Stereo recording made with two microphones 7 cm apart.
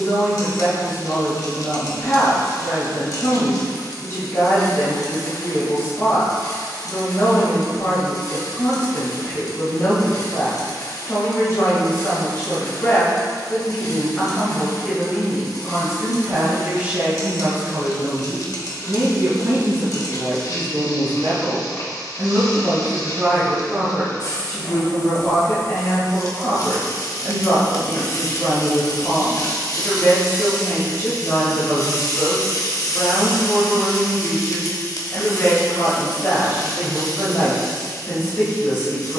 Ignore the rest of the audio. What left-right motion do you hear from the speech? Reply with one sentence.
You can hear the speech go right and come back.